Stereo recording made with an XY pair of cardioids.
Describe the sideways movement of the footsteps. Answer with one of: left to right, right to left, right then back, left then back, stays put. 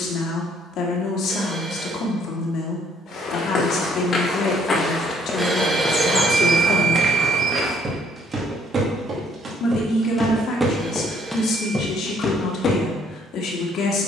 right then back.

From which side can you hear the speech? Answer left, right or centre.
left.